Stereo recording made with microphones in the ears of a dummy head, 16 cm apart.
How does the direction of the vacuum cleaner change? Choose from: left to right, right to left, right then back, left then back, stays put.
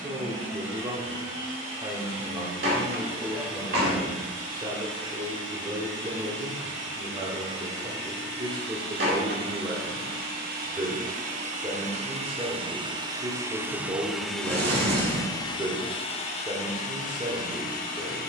right to left.